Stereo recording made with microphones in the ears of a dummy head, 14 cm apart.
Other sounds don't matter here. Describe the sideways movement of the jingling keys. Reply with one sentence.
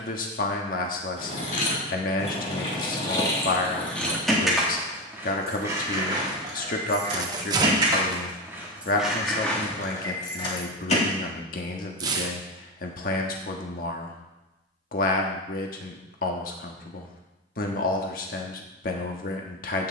You can hear the jingling keys go right and come back.